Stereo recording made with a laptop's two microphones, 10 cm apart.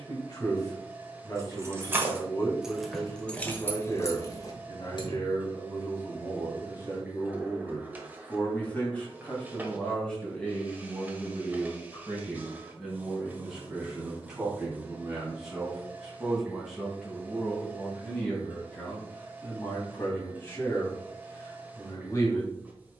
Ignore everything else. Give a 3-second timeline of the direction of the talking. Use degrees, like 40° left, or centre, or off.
30° left, 30° left, 20° left, 10° left, centre, centre, 20° left, 30° left.